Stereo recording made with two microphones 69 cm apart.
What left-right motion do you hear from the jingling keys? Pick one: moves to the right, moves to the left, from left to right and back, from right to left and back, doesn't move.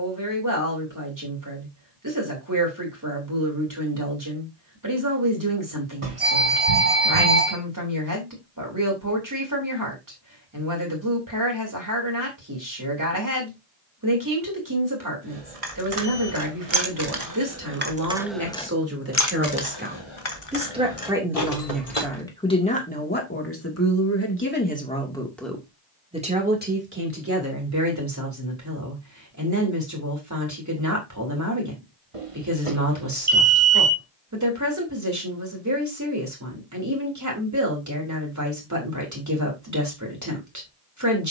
moves to the left.